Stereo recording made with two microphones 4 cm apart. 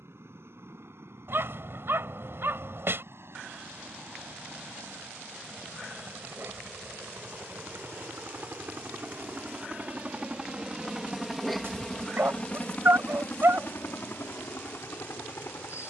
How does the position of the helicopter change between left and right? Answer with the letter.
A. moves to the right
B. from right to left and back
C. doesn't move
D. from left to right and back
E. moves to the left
E.